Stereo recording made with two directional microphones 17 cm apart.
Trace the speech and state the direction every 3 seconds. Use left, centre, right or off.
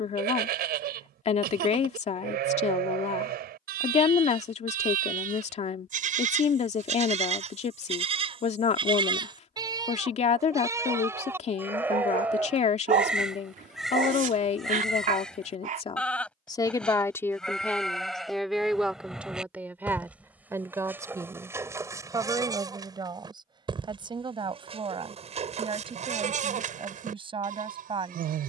left, left, left, left, left, left, centre, right, right, right.